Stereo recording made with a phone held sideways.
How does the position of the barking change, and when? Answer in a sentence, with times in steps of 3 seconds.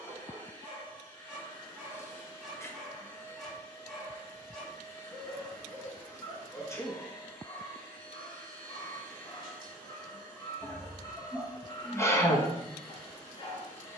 You can hear the barking in the centre from 0 s and on the left from 6 s.